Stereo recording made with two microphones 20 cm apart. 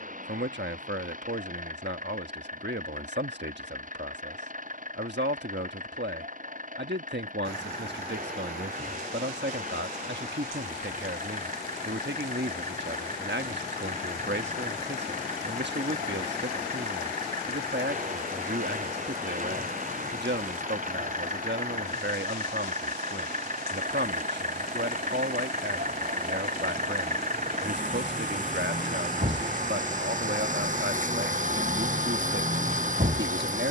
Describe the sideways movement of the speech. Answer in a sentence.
You can hear the speech stay in one place.